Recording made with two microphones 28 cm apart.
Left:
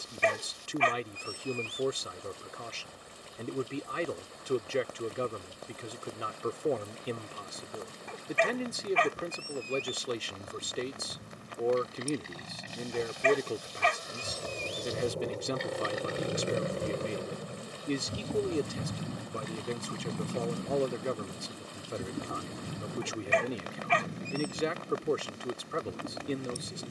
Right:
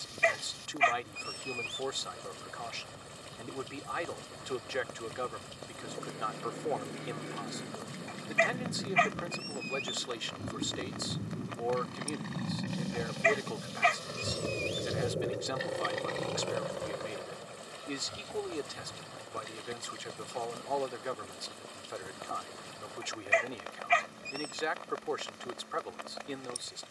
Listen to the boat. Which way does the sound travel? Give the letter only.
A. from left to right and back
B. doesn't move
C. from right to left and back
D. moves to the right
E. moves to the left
E.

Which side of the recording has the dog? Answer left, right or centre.
left.